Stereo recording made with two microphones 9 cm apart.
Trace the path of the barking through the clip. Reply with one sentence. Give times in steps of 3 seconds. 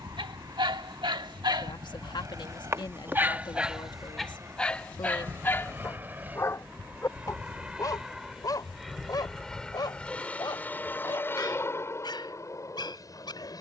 In this clip you hear the barking on the right from 0 s, in the centre from 3 s and on the left from 6 s.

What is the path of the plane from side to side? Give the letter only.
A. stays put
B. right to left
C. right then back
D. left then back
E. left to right
B.